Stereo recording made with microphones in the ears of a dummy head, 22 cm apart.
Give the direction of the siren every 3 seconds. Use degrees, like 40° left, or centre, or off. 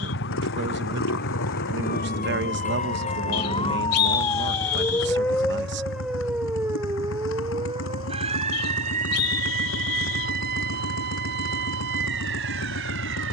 40° left, 10° left, 20° right, 40° right, 50° right.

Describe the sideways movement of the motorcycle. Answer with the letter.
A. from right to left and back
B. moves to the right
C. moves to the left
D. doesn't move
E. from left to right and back
D.